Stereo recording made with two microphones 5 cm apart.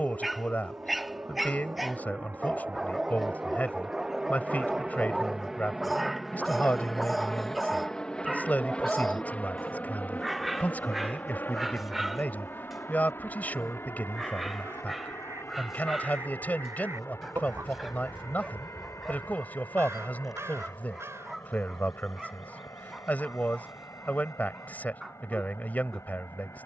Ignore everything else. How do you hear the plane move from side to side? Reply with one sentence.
In this clip you hear the plane travel towards the left.